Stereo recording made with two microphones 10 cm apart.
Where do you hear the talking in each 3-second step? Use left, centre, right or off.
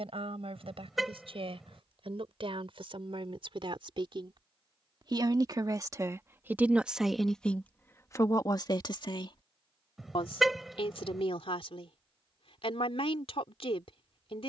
right, right, centre, left, left.